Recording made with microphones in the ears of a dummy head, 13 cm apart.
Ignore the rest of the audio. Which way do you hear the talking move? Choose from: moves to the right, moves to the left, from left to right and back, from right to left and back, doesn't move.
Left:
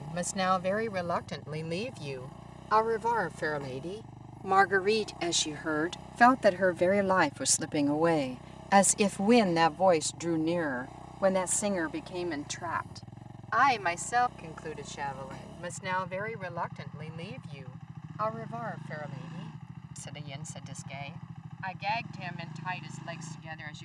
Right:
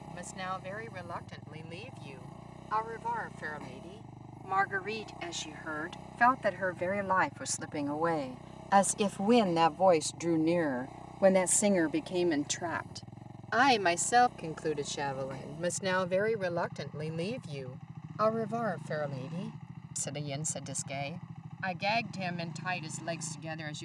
moves to the right.